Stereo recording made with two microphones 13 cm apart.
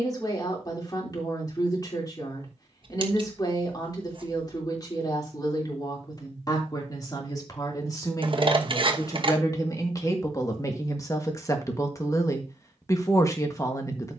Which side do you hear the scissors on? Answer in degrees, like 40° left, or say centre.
40° right.